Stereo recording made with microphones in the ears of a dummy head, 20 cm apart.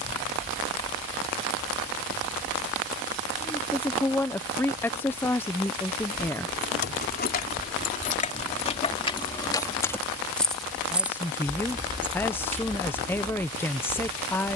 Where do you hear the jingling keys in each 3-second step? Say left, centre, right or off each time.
off, off, left, centre, right.